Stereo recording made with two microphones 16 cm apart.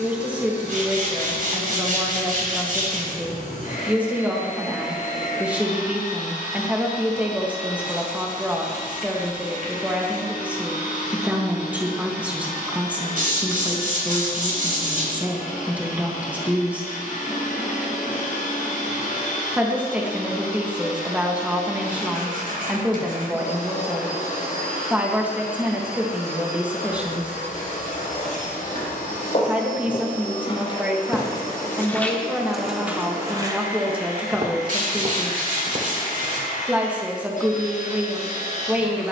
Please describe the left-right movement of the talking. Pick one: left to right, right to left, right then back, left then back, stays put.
stays put.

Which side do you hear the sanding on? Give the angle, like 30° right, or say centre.
60° right.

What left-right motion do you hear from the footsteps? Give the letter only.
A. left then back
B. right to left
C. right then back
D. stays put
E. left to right
E.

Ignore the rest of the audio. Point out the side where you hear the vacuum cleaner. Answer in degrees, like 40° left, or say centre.
60° left.